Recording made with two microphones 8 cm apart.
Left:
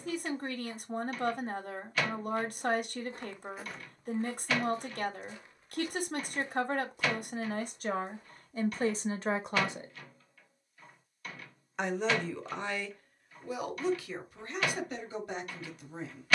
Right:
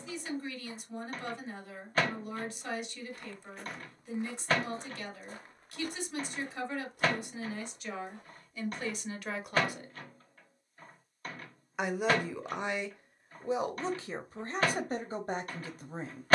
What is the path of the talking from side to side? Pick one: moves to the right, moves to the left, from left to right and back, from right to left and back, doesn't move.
moves to the right.